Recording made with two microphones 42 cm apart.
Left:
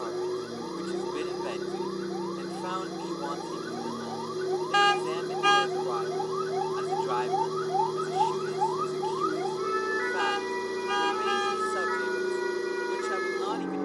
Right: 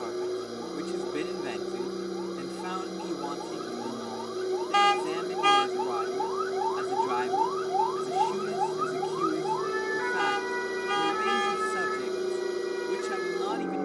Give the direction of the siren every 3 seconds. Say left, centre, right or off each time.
left, left, left, right, right.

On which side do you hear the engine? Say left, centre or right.
centre.